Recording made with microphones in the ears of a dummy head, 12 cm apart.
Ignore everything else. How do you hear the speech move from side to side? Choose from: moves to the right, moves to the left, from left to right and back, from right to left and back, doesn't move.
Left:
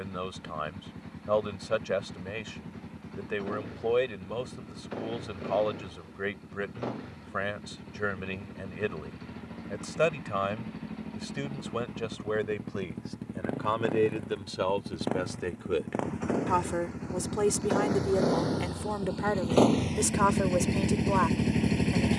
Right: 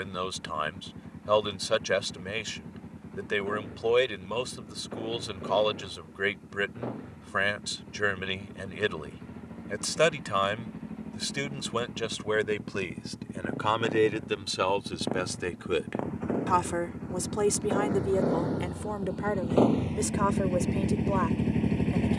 moves to the left.